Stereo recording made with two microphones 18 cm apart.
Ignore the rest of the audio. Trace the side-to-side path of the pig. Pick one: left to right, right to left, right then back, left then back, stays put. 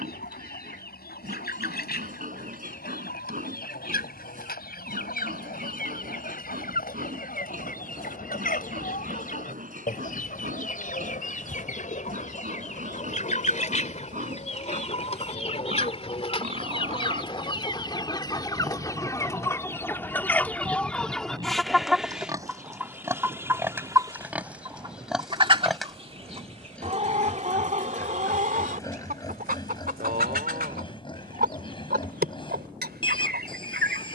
right to left.